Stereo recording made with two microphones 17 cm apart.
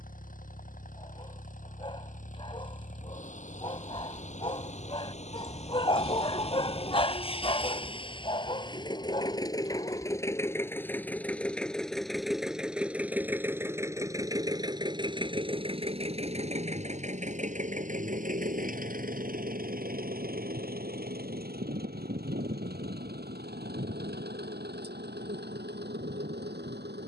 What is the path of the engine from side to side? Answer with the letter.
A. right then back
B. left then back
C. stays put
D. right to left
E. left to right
E.